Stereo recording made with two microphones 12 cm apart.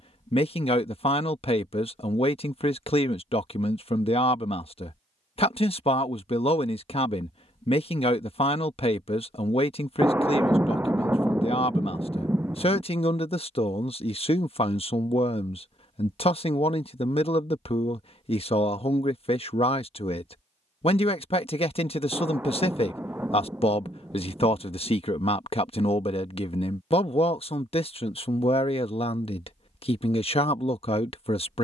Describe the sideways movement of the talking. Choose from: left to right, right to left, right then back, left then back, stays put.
stays put.